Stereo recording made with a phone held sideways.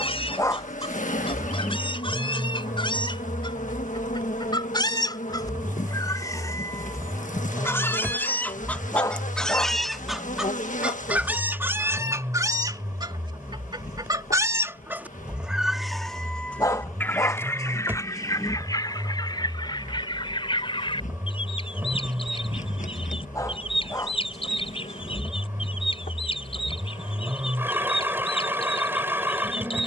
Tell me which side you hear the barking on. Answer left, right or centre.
left.